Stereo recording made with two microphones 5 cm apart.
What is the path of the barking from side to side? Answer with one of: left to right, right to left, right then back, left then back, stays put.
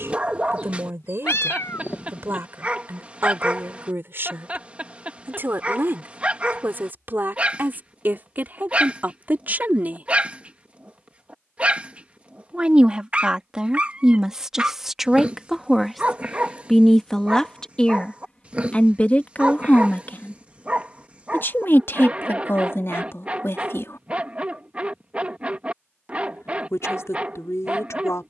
stays put.